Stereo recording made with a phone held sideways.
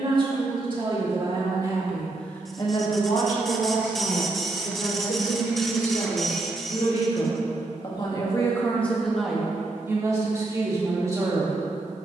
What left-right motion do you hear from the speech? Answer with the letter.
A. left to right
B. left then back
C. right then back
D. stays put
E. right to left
B.